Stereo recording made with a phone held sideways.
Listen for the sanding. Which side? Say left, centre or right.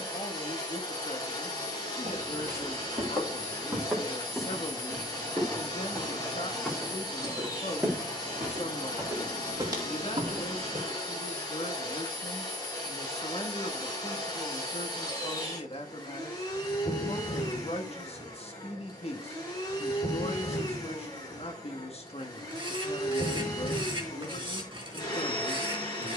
right.